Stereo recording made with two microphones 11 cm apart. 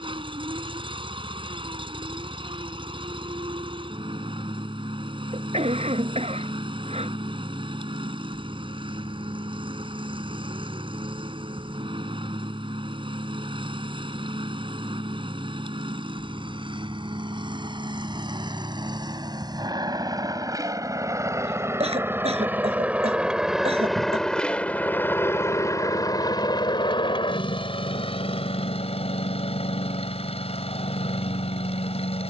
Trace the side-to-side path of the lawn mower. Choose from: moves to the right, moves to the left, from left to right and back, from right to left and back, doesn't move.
moves to the left.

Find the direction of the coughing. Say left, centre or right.
right.